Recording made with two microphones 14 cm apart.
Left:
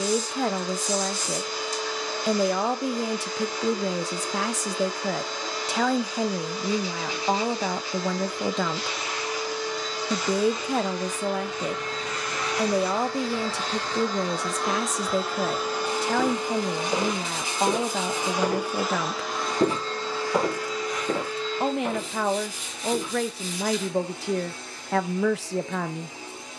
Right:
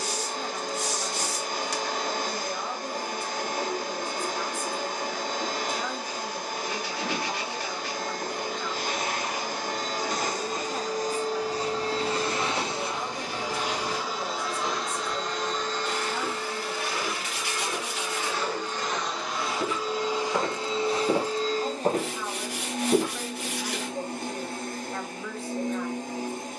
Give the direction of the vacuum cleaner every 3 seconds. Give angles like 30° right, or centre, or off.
50° right, 50° right, 50° right, 40° right, 10° right, 20° left, centre, 50° right, 50° right.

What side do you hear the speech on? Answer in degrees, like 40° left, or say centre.
80° left.